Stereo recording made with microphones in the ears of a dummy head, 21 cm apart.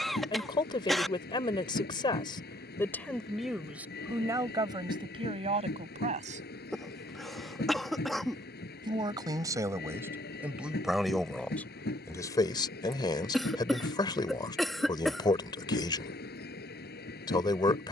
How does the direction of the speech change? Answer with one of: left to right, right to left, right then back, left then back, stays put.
right then back.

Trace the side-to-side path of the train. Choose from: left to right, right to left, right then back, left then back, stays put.
stays put.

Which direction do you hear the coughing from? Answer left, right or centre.
centre.